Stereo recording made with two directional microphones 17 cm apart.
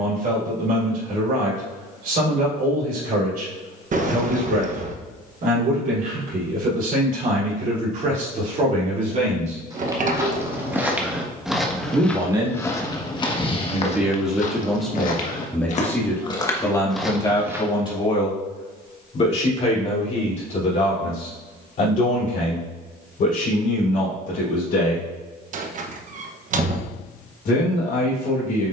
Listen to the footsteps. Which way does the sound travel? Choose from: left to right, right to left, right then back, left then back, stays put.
left then back.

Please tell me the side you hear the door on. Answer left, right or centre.
right.